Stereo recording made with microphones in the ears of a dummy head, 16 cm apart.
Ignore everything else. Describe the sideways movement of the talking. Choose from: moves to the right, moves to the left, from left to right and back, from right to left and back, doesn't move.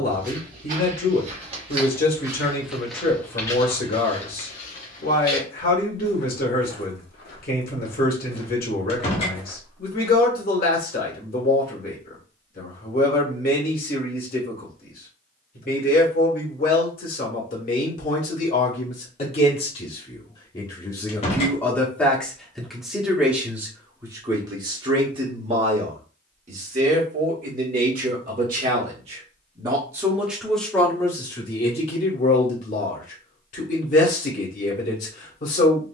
from left to right and back.